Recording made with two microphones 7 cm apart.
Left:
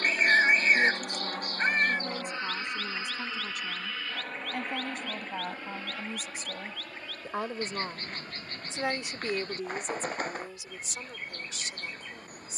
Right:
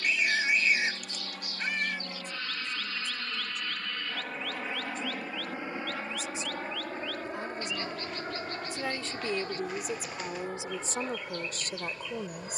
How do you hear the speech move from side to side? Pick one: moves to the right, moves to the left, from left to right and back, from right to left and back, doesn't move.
moves to the right.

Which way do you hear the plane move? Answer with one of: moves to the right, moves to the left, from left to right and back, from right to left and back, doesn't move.
moves to the right.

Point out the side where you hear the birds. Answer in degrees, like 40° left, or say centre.
50° left.